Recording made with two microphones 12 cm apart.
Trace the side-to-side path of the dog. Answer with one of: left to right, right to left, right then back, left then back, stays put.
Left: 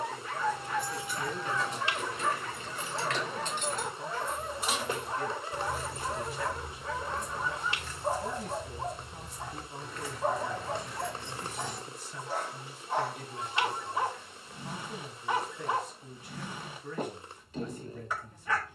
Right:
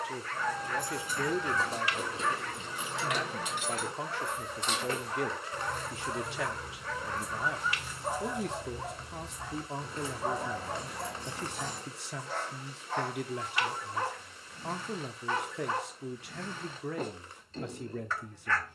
stays put.